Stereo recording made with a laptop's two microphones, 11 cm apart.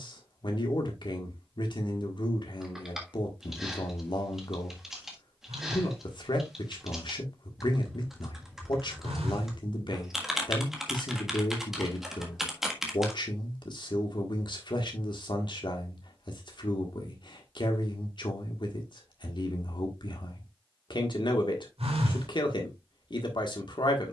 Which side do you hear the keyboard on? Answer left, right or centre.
centre.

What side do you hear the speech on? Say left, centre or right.
left.